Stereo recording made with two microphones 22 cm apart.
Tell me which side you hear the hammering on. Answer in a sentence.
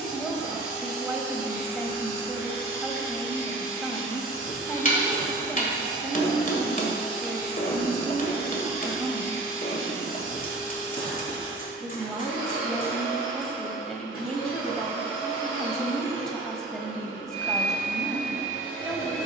You can hear the hammering on the left.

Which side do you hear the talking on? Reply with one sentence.
In this clip you hear the talking in the centre.